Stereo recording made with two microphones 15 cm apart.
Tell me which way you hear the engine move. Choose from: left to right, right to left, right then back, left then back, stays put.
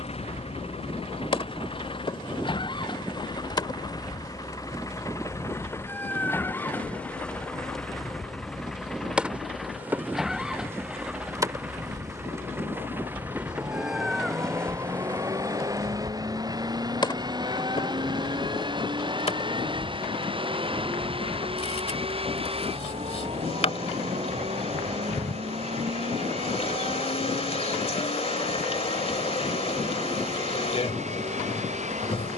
left to right.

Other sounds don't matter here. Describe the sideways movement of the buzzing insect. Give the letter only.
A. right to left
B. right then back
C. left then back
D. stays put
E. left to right
B.